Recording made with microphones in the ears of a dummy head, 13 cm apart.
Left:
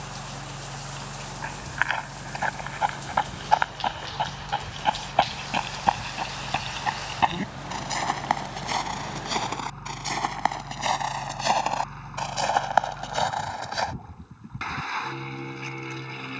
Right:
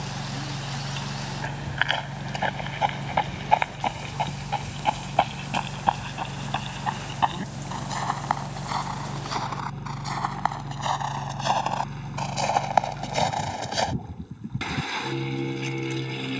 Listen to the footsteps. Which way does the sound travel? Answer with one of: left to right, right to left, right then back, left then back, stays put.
left then back.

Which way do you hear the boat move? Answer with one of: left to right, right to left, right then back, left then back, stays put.
stays put.